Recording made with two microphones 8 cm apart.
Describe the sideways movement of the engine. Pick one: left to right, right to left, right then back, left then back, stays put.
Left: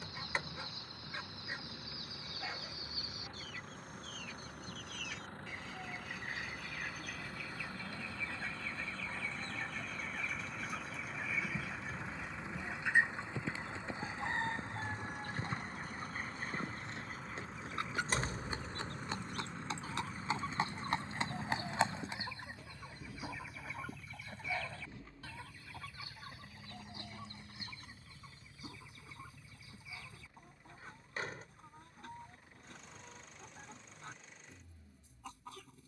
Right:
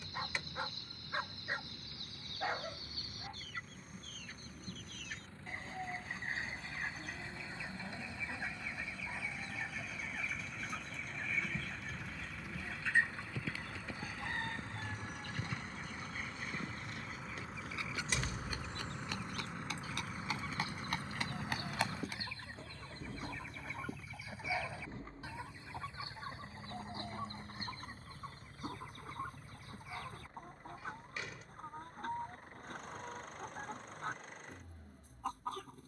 left to right.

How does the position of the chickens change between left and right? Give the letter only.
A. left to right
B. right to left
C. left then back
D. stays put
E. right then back
C.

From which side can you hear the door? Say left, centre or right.
left.